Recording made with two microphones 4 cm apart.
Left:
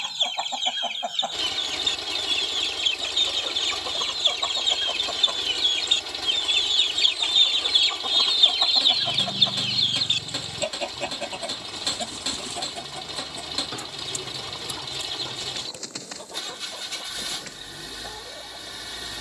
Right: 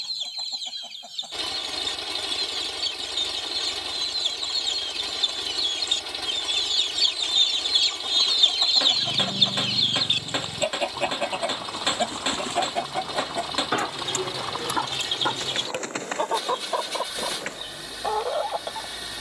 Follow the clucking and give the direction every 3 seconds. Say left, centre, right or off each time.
left, left, left, centre, right, right, right.